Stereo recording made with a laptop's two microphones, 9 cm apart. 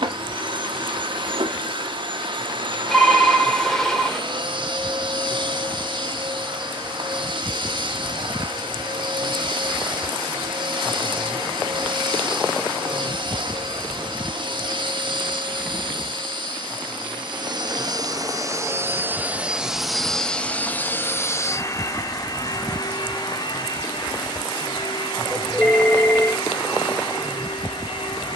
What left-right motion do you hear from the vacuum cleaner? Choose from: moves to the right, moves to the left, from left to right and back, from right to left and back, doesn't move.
moves to the left.